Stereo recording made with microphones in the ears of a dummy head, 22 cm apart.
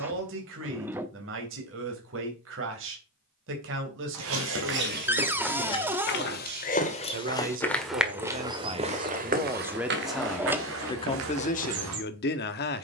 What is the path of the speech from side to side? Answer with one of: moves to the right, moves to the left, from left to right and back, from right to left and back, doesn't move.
moves to the left.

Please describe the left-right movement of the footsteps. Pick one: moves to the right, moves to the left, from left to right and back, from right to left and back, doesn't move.
from right to left and back.